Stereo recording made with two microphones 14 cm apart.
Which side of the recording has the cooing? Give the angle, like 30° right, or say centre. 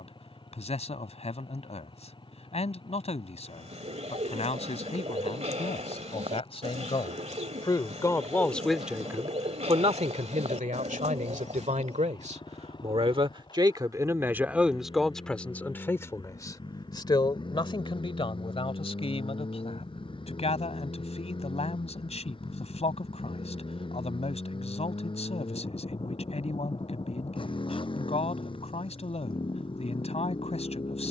50° right.